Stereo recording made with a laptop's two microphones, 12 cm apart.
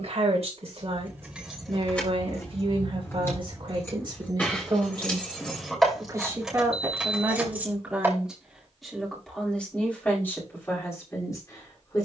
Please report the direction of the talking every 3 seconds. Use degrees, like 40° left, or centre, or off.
60° right, 40° right, 10° right, 20° left.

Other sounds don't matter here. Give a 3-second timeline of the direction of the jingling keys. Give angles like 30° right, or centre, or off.
10° left, 10° left, 10° right, off.